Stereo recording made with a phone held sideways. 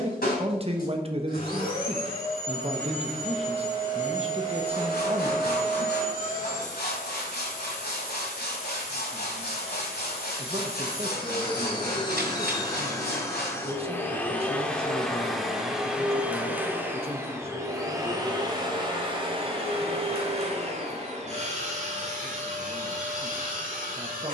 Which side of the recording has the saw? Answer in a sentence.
You can hear the saw on the left.